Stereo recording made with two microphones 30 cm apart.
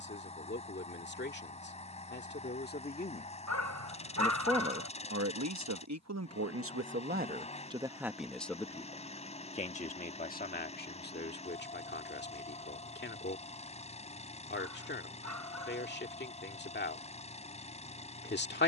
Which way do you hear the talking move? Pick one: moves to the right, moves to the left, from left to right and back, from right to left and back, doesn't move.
from left to right and back.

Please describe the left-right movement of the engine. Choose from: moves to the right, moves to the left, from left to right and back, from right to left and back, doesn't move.
doesn't move.